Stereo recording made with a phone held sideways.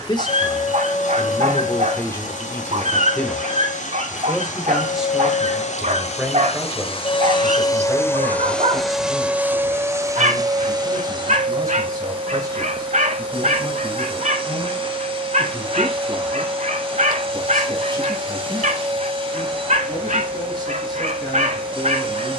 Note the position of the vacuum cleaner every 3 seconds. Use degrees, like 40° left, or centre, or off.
70° left, 70° left, 30° left, 30° right, 40° right, 40° right, 40° right, 40° right.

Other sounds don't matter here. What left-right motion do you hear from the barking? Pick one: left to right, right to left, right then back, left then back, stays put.
stays put.